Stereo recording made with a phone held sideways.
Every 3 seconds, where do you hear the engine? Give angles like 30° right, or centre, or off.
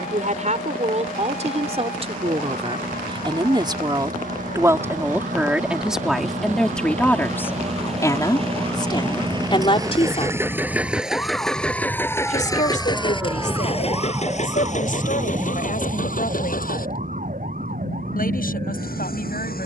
70° right, 60° right, 50° right, 10° right, 40° left, 60° left, 70° left.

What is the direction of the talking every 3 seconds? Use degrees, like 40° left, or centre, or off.
50° right, 20° right, 10° left, 40° left, 60° left, 60° left, 70° left.